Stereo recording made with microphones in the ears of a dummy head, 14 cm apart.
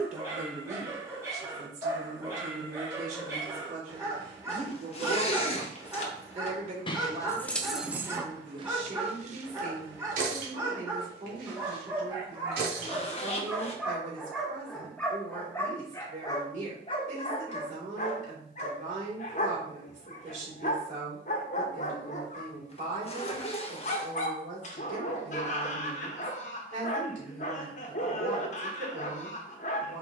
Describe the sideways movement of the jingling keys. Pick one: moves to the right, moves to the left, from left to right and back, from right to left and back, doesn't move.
moves to the right.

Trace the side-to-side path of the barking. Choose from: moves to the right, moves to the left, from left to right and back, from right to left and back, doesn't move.
moves to the left.